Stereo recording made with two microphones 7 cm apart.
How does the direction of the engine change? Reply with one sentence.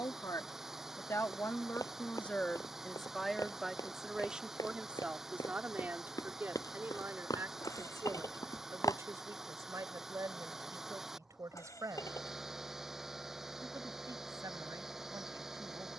In this clip you hear the engine stay put.